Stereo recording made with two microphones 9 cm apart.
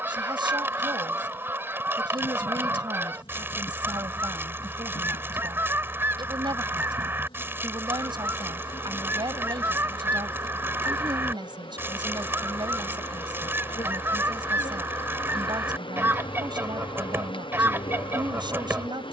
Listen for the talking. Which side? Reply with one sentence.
In this clip you hear the talking on the right.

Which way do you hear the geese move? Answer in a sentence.
You can hear the geese stay put.